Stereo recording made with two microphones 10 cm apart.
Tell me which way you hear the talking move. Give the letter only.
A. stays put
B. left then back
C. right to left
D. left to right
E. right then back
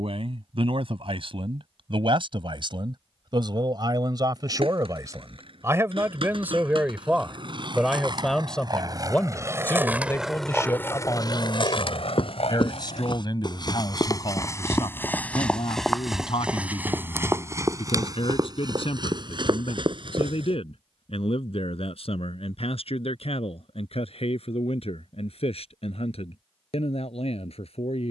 C.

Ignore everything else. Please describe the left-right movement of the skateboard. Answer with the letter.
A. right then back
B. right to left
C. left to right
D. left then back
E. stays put
B.